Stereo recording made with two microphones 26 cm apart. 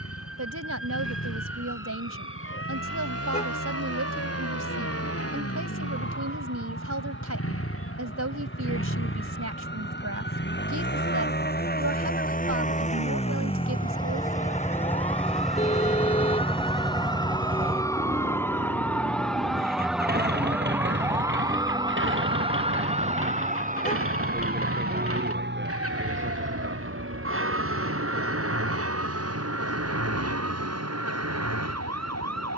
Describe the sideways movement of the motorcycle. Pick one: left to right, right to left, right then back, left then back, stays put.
left to right.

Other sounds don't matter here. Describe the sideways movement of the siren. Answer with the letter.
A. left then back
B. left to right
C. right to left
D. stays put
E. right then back
B.